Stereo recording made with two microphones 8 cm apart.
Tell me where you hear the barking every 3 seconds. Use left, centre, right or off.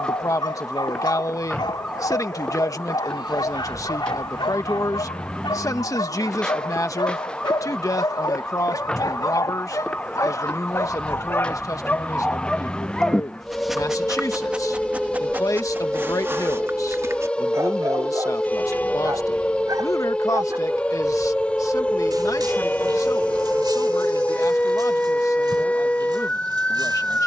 left, left, left, left, centre, right, right, right, right.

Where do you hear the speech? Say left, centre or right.
left.